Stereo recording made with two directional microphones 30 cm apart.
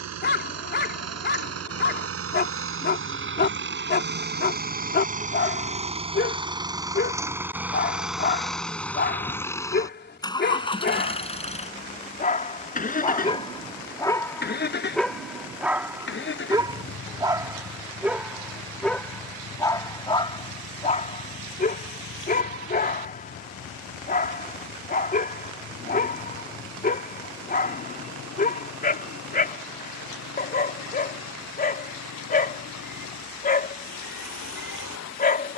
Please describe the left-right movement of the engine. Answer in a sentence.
In this clip you hear the engine go from the right side to the left.